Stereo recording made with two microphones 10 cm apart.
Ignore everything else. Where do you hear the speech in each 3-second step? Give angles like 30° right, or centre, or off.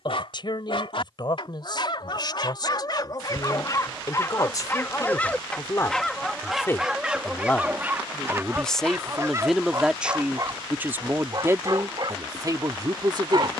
50° left, 40° left, 20° left, 10° right, 40° right.